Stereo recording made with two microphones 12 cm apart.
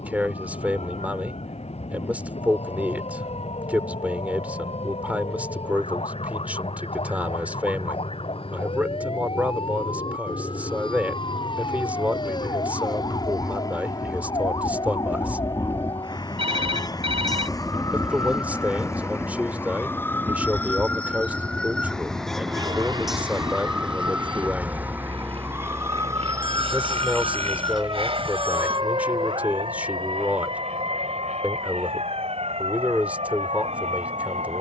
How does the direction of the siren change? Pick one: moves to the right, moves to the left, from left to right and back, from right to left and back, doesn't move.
moves to the right.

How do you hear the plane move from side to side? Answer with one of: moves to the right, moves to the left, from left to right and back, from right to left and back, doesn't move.
moves to the right.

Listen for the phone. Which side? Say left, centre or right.
right.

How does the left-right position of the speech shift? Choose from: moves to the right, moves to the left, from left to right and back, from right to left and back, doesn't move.
doesn't move.